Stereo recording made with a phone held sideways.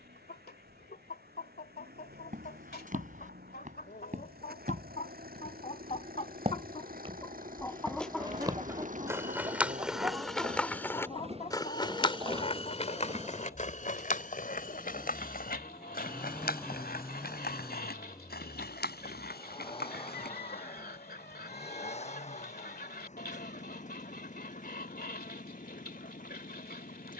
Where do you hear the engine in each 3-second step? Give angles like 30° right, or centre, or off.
80° right, 70° right, 60° right, 50° right, 20° right, 10° left, 30° left, 40° left, 50° left.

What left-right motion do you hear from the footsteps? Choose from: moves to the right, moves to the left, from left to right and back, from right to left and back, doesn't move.
moves to the left.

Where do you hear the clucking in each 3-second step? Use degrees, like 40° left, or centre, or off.
70° left, 70° left, 20° left, 20° left, 70° left, 70° left, 70° left, 70° left, 70° left.